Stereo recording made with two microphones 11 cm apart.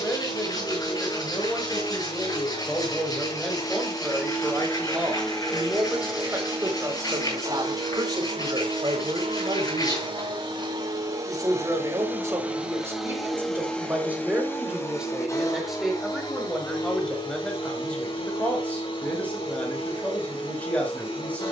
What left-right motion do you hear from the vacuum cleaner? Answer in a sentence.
In this clip you hear the vacuum cleaner go right and come back.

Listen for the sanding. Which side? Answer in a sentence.
You can hear the sanding on the left.